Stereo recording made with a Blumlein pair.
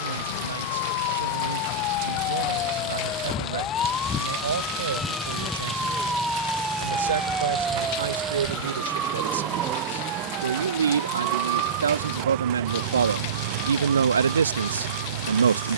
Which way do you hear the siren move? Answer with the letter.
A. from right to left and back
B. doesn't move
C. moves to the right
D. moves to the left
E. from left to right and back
C.